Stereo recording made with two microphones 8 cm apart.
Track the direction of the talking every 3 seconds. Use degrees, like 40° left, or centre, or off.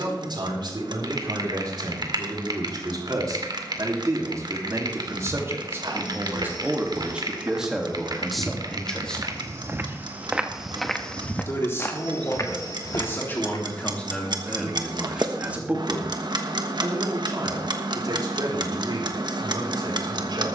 60° right, 40° right, 10° right, 30° left, 20° left, 30° right, 70° right.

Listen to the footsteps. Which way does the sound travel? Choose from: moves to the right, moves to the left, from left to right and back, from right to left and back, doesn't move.
moves to the left.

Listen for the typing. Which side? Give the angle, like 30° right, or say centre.
60° right.